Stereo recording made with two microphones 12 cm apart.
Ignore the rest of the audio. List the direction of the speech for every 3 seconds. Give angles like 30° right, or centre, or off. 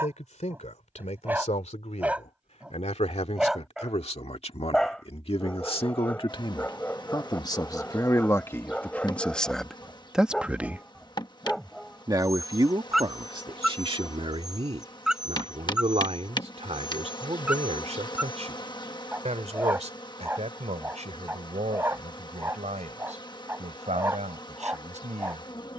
70° left, 60° left, 30° left, centre, 40° right, 60° right, 70° right, 70° right, 70° right.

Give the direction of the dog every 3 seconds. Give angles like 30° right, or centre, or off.
10° right, centre, 10° left, centre, centre, 10° right, 10° right, 20° right, 20° right.